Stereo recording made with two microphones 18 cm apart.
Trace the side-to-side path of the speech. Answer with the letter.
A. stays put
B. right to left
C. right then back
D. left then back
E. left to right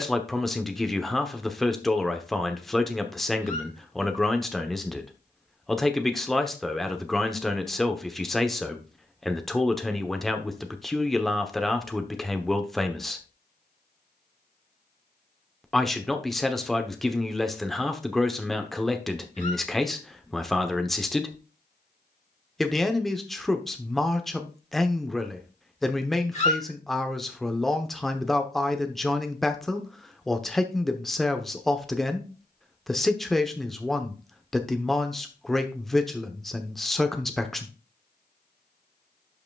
A.